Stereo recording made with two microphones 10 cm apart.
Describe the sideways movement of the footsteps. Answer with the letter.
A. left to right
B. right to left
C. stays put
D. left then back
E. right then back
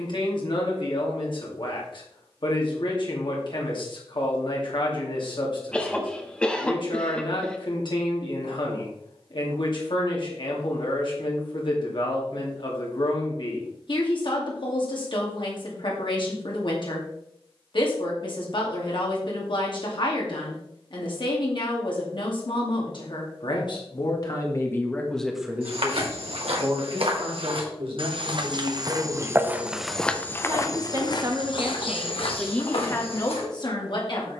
B.